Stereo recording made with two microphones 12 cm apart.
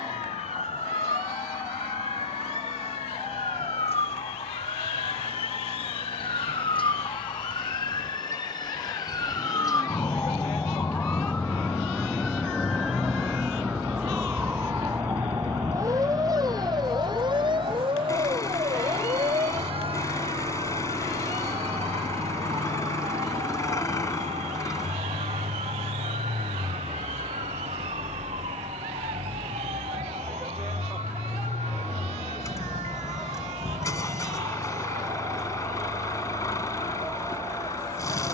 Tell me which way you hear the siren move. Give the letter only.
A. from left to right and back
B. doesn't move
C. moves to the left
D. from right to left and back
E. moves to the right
E.